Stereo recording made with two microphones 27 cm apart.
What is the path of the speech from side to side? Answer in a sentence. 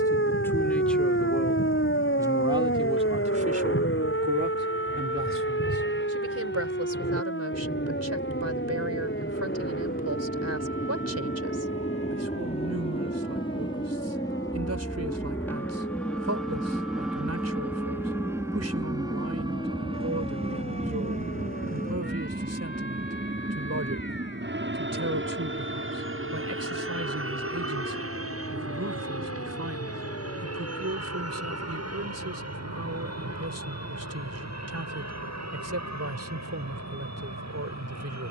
In this clip you hear the speech travel towards the right.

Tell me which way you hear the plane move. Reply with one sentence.
You can hear the plane go from the left side to the right.